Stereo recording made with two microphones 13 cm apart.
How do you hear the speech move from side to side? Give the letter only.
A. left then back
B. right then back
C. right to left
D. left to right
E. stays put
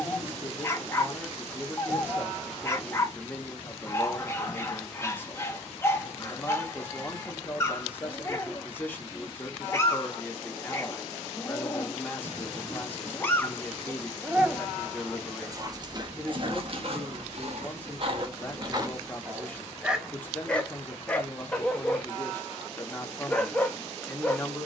E.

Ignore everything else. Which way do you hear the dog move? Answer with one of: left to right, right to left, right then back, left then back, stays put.
right then back.